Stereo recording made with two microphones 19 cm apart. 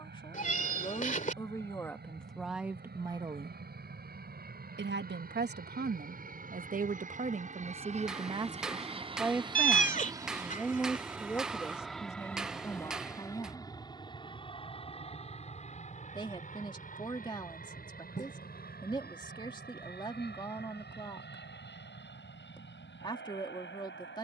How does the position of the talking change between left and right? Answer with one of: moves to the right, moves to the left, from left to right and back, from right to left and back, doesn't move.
from left to right and back.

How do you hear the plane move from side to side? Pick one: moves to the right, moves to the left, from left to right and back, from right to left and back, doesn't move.
moves to the left.